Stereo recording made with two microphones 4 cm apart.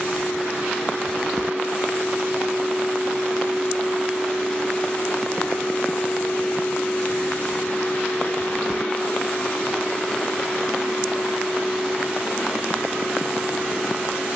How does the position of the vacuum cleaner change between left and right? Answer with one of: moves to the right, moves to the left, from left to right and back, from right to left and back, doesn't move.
from right to left and back.